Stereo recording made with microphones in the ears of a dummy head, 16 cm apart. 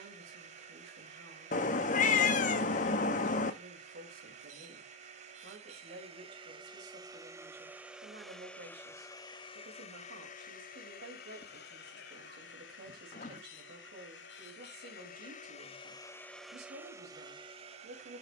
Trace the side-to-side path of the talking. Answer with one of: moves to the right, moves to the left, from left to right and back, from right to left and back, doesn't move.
doesn't move.